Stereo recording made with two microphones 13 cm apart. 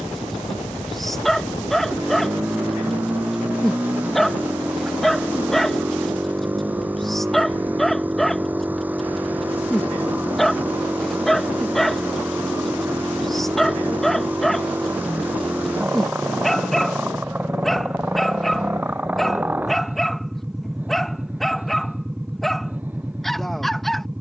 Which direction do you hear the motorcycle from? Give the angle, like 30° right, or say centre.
10° right.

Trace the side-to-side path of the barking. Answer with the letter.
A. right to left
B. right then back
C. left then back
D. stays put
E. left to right
D.